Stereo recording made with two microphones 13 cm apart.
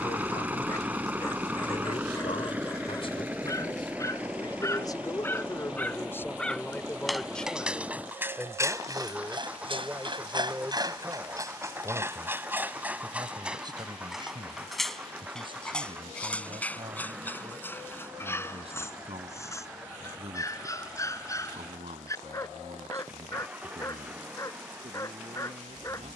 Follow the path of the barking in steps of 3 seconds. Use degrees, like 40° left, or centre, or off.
20° left, 20° left, 10° right, 30° right, 10° right, 10° left, 20° left, 20° left, 20° left.